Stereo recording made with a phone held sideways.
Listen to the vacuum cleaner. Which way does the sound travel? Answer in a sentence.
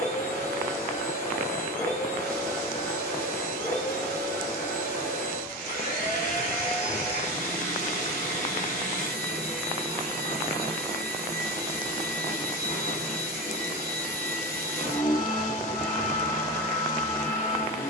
In this clip you hear the vacuum cleaner stay put.